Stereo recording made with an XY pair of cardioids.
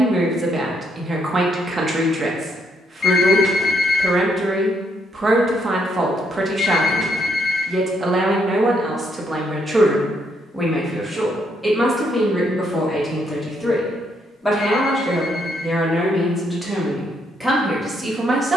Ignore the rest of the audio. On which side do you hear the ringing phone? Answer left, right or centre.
left.